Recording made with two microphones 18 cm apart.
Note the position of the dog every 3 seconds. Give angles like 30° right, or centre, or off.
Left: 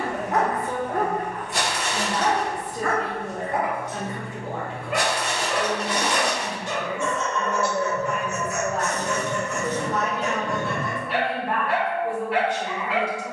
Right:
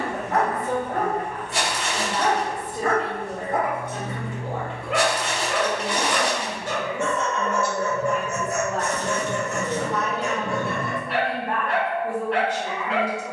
10° left, 60° right, 50° right, 10° right, centre.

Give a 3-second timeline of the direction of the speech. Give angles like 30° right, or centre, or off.
20° right, 20° right, centre, 10° left, 10° right.